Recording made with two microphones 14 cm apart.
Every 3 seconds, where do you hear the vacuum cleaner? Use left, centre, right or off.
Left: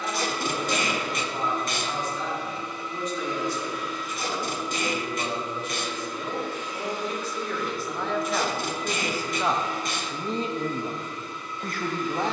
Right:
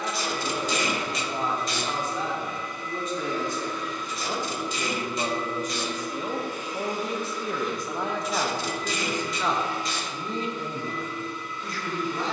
left, centre, centre, left.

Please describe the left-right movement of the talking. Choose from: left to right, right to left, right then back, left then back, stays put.
right to left.